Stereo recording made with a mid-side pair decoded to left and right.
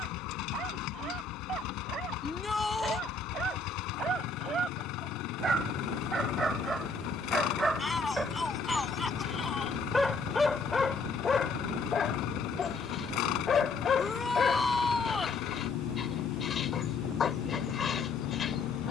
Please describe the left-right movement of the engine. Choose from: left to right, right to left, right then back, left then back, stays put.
stays put.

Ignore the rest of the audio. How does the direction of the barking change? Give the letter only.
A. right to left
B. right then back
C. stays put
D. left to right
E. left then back
A.